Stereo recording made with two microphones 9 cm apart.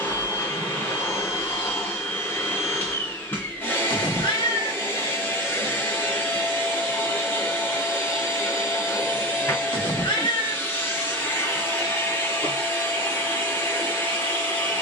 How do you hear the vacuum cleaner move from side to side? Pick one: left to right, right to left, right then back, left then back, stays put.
stays put.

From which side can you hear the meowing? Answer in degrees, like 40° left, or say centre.
70° left.